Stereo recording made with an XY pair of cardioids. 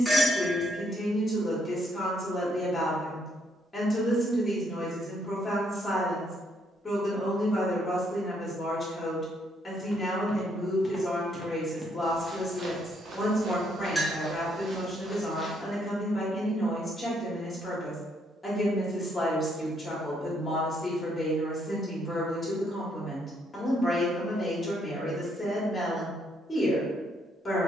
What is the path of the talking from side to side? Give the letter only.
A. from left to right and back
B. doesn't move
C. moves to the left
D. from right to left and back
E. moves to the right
B.